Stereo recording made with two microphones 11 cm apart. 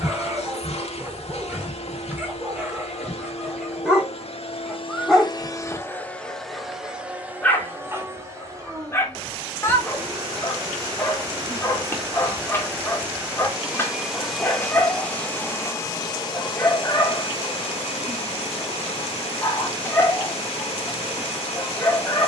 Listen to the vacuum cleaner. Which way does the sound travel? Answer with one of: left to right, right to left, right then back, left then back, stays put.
right then back.